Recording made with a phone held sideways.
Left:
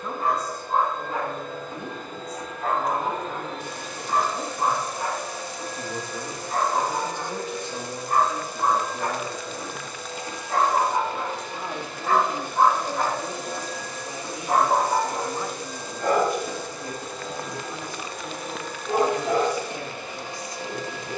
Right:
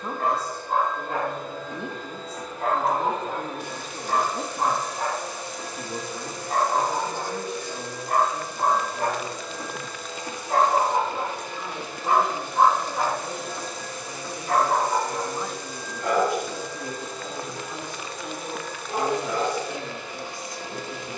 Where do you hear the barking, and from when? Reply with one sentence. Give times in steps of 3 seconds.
In this clip you hear the barking on the right from 0 s, in the centre from 12 s and on the left from 15 s.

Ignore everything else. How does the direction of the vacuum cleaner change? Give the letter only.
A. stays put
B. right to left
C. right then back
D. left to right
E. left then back
A.